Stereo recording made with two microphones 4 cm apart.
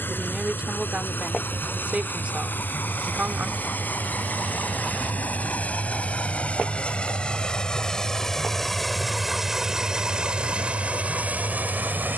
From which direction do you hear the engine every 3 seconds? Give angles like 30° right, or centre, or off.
50° left, 40° left, 20° left, 30° right.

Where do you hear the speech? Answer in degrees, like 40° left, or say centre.
40° right.